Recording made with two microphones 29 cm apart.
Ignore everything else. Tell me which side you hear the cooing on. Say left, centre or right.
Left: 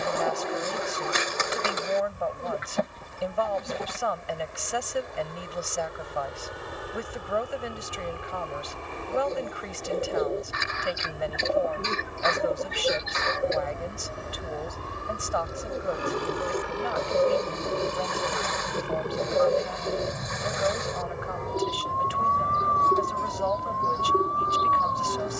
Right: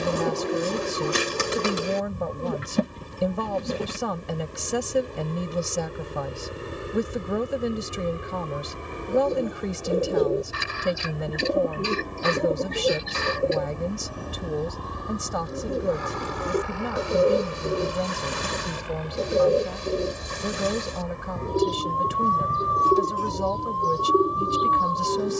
right.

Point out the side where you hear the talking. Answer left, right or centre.
right.